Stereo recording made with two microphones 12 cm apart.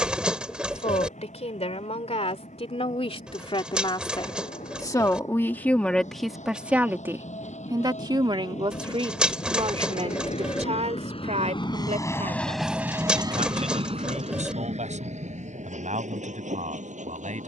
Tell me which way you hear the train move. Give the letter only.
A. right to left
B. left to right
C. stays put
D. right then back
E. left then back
B.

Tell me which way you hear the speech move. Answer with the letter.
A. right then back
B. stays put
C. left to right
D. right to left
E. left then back
C.